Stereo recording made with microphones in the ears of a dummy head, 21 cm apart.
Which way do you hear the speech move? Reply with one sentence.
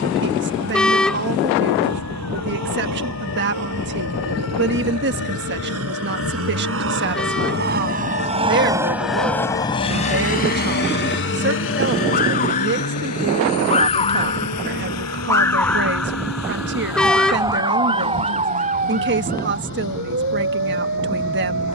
You can hear the speech stay in one place.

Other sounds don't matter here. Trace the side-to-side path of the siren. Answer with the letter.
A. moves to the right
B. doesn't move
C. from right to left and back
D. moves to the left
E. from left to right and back
A.